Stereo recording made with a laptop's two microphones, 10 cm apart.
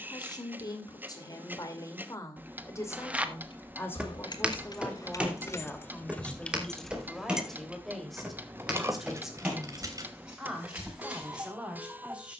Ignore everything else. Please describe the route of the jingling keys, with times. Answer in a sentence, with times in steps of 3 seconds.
In this clip you hear the jingling keys not at all from 0 s, on the left from 3 s, in the centre from 6 s and on the right from 9 s.